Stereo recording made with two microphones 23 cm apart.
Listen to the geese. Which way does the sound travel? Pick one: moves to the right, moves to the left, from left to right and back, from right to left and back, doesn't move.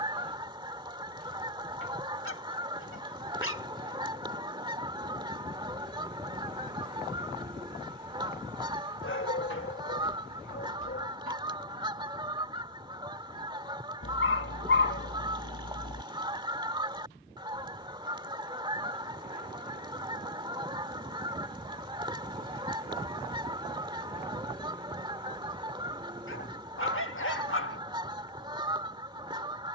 doesn't move.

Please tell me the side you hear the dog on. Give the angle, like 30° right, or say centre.
70° left.